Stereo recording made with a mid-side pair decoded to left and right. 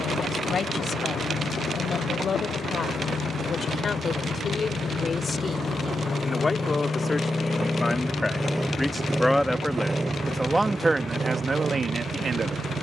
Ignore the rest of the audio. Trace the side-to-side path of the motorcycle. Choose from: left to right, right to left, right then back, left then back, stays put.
left to right.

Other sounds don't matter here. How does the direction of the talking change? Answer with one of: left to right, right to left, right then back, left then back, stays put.
left to right.